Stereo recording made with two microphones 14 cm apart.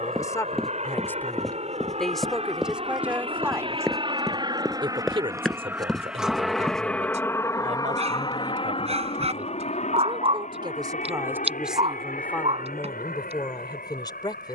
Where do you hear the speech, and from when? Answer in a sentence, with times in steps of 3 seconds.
You can hear the speech in the centre from 0 s, on the right from 3 s and on the left from 12 s.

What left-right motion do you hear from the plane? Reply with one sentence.
In this clip you hear the plane go from the right side to the left.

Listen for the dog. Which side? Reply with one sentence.
You can hear the dog on the right.